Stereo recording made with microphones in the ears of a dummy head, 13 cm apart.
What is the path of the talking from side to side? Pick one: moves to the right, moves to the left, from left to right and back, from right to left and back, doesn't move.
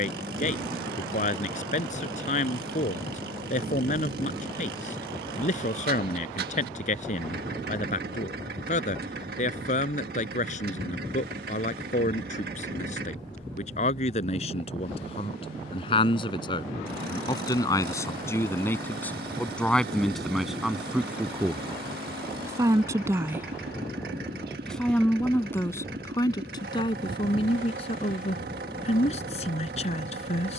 from left to right and back.